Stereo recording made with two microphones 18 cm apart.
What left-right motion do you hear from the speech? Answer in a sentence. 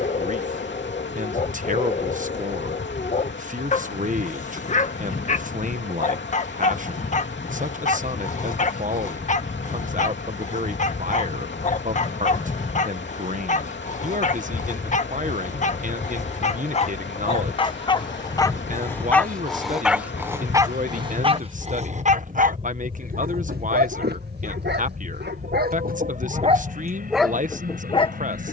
In this clip you hear the speech stay put.